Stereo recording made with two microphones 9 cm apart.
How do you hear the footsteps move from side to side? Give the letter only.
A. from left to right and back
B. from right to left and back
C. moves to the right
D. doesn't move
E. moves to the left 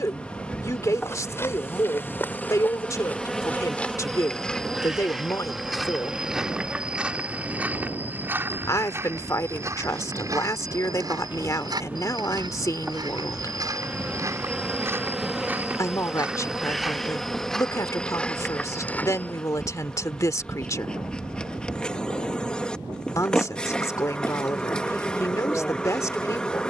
A.